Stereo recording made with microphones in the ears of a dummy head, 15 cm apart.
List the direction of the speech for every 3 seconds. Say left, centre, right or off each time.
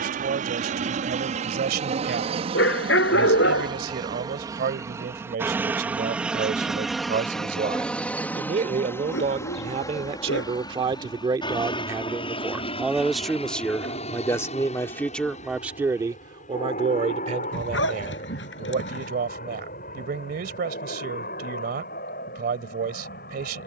right, right, right, right, centre, right, right, right.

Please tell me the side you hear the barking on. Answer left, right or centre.
left.